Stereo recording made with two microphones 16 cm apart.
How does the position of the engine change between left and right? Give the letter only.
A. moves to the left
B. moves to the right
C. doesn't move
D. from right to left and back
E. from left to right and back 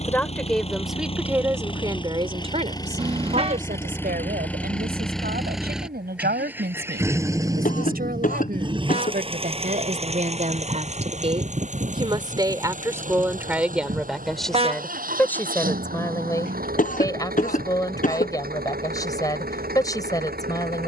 B.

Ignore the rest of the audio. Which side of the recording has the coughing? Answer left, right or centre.
left.